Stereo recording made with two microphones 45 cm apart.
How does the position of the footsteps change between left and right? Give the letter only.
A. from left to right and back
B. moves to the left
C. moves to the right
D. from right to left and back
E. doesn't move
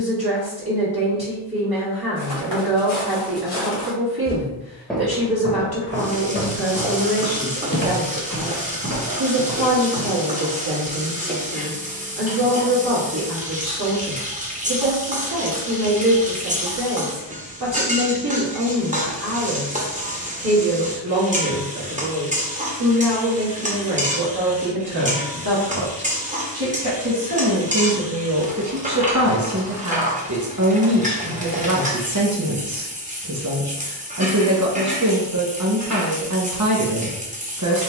A.